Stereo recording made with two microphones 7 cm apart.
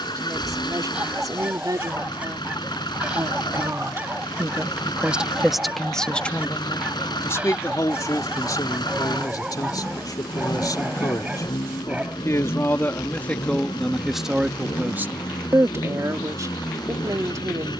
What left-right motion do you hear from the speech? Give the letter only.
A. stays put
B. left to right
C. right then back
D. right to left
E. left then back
E.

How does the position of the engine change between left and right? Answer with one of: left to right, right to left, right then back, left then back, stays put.
stays put.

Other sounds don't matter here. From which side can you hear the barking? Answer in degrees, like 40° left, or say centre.
20° right.